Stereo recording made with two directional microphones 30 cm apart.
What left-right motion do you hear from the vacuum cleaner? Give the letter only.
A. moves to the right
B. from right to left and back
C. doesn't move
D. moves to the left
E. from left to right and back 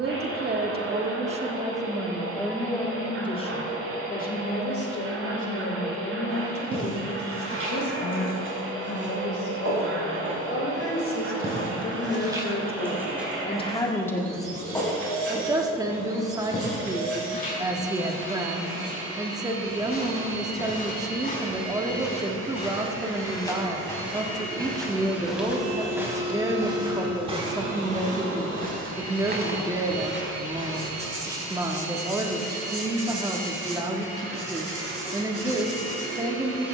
C.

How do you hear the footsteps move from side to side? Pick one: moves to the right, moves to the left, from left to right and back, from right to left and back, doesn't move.
from right to left and back.